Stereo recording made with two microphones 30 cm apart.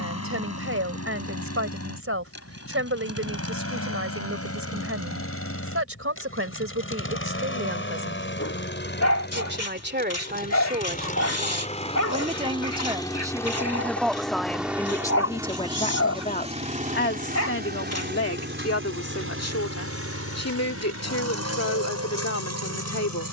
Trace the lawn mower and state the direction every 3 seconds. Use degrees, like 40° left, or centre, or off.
60° left, 50° left, 40° left, 30° left, 10° left, 20° right, 50° right, 60° right.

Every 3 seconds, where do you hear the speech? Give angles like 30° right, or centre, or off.
50° right, 50° right, 50° right, 30° right, 10° right, 30° left, 60° left, 60° left.